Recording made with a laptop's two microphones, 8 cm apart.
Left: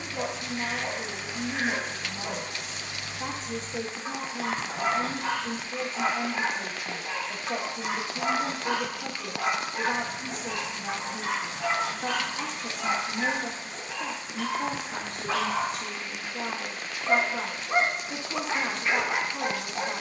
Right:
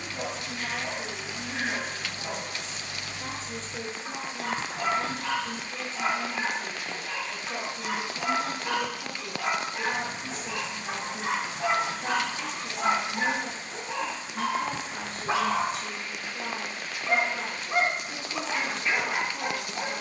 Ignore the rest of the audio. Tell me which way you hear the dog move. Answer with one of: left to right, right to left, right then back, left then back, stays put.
right then back.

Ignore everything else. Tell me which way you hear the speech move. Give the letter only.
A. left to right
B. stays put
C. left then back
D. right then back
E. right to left
B.